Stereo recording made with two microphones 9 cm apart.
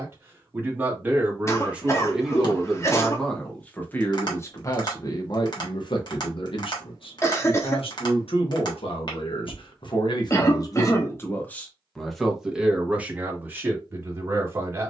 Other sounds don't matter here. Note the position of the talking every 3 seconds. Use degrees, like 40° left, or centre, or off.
10° right, 30° left, 70° left, 40° left, 20° right.